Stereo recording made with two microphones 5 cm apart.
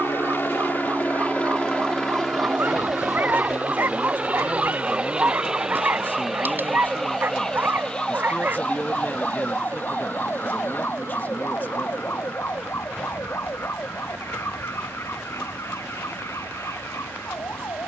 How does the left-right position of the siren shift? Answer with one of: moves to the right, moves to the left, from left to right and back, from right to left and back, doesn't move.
moves to the left.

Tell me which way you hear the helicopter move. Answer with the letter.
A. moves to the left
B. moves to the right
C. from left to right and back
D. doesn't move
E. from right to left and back
B.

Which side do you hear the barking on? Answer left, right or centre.
right.